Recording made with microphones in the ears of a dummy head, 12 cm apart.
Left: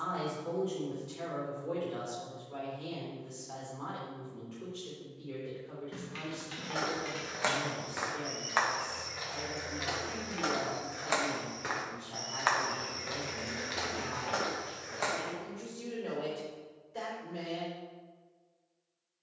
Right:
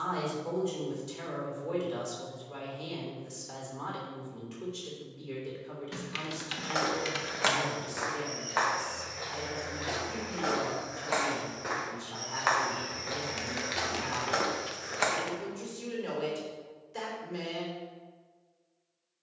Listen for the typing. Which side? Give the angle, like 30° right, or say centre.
60° right.